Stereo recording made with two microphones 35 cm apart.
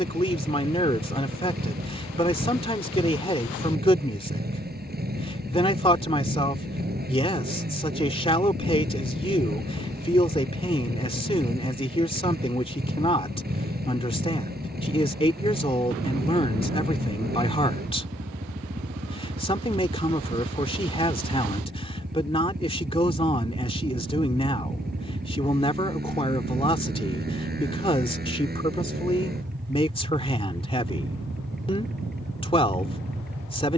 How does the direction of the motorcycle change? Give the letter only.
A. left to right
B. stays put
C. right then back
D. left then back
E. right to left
B.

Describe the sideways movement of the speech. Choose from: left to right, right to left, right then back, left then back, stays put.
stays put.